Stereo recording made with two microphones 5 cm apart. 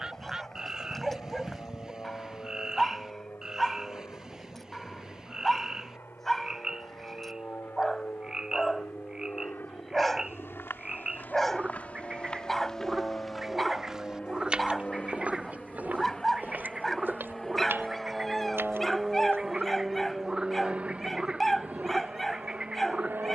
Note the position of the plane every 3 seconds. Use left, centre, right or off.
left, left, left, left, left, centre, centre, right.